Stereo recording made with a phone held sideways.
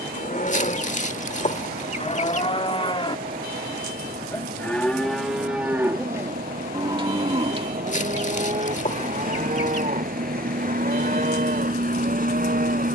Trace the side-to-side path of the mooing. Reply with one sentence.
In this clip you hear the mooing travel towards the right.